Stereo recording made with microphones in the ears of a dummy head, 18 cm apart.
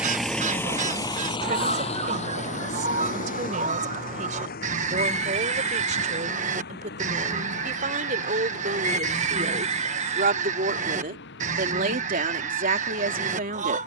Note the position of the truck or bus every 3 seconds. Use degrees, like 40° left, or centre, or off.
20° left, 40° left, 50° left, 50° left, 60° left.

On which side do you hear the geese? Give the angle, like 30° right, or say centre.
40° right.